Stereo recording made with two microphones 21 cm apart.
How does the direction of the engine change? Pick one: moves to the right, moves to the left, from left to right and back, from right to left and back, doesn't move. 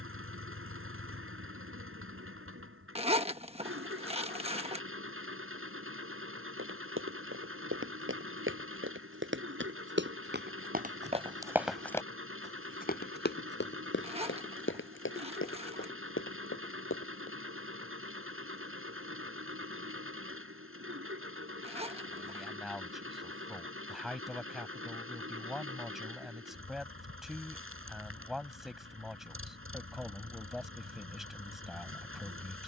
doesn't move.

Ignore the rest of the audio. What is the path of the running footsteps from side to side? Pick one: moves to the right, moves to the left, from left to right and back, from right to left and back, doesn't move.
moves to the left.